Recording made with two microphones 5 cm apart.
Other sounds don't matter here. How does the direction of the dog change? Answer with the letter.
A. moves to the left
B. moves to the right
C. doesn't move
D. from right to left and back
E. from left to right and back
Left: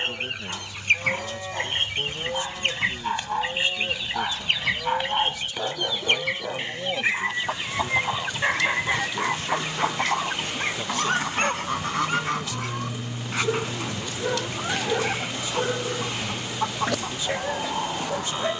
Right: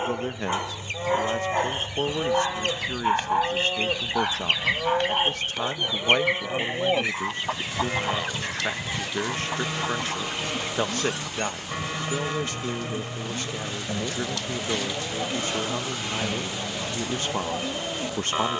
A.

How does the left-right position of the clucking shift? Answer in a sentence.
In this clip you hear the clucking move from left to right and back again.